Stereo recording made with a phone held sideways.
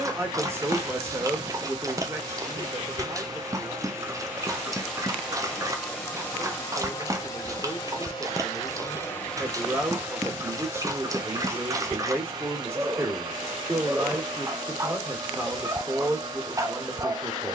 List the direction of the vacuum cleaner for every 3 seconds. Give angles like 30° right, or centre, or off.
40° right, 10° right, 30° left, 20° right, 30° right, 30° right.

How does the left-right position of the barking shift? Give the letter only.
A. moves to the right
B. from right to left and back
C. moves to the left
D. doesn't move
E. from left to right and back
D.